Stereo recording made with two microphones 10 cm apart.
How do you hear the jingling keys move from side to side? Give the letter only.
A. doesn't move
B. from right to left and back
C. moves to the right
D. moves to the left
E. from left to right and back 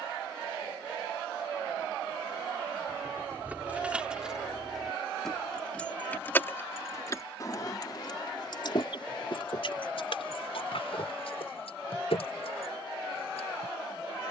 D.